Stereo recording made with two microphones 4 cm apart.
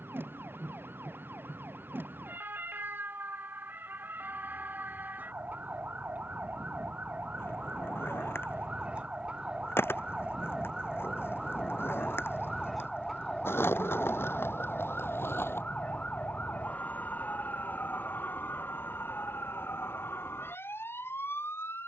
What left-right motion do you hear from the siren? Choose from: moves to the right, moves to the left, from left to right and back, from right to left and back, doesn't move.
moves to the left.